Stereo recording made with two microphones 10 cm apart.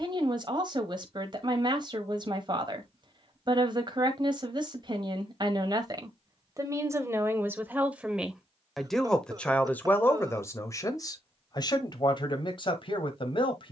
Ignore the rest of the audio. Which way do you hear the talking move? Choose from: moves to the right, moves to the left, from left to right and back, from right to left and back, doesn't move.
moves to the left.